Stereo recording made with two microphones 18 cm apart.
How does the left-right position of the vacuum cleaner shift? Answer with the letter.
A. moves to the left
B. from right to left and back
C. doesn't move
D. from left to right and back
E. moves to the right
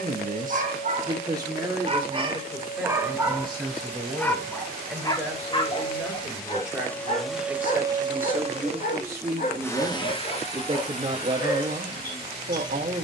D.